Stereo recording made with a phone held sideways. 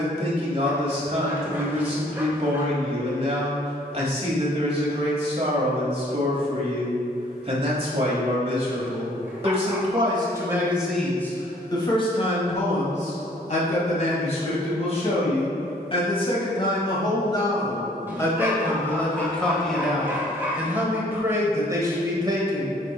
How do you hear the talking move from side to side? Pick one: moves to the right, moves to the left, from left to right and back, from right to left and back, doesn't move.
from right to left and back.